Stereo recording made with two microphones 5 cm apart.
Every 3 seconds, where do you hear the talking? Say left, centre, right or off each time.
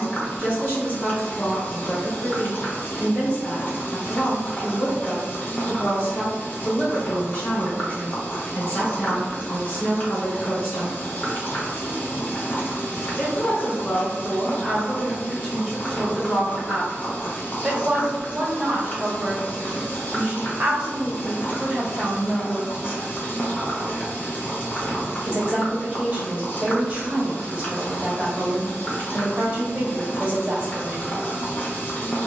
left, left, left, left, left, centre, right, right, right, right, right.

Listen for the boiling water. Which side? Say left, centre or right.
left.